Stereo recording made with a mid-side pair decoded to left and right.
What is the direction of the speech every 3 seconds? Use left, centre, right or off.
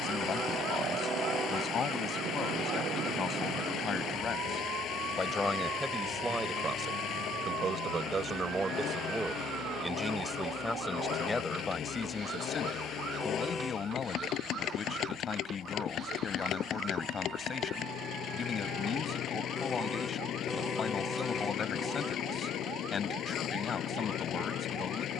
left, left, right, centre, left, left, left, left, left.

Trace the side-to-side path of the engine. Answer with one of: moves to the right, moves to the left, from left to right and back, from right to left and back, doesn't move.
doesn't move.